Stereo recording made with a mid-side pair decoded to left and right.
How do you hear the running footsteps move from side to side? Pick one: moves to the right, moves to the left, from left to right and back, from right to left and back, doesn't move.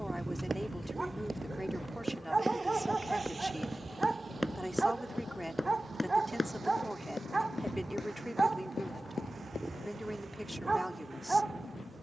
moves to the left.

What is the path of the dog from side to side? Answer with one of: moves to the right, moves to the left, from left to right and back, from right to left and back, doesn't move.
doesn't move.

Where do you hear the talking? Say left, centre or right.
centre.